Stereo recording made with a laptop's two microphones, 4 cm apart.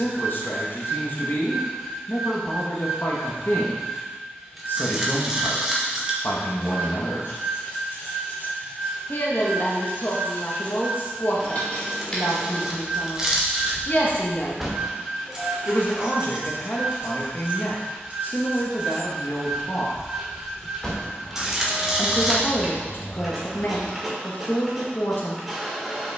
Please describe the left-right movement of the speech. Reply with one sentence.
In this clip you hear the speech stay put.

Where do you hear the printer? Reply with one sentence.
In this clip you hear the printer in the centre.